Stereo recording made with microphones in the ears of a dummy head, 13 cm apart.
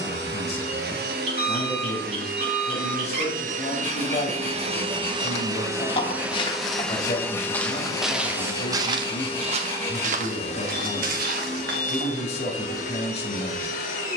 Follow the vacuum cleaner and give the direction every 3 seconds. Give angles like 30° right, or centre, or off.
80° right, 40° right, 10° left, 50° left, 60° left.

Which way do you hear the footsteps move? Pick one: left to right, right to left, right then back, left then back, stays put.
left to right.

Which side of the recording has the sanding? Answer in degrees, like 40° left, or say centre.
20° left.